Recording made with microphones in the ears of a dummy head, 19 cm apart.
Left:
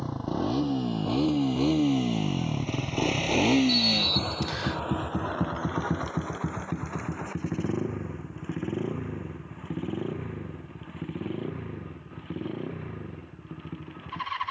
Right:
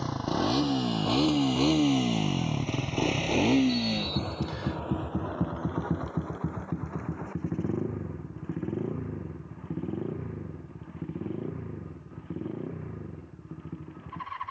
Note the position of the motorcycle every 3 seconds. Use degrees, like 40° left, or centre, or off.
30° right, 30° left, 60° left, 70° left, 80° left.